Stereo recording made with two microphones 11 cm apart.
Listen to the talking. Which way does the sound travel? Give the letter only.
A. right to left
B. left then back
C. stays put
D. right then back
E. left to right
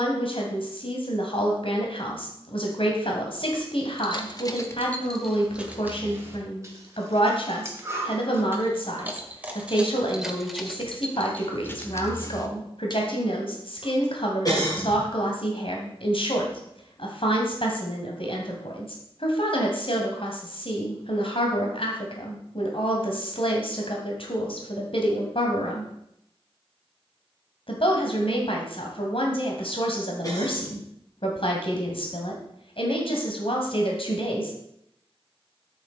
C.